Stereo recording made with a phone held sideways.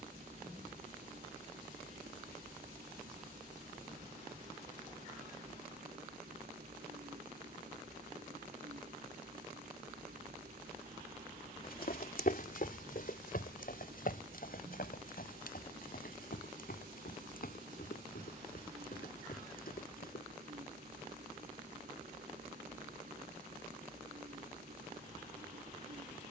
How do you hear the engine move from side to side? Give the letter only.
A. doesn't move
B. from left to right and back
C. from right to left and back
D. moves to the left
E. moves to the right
A.